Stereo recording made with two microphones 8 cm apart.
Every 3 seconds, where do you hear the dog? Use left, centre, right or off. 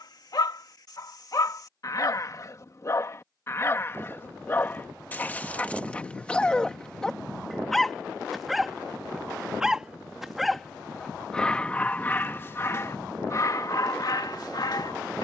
left, left, centre, centre, left.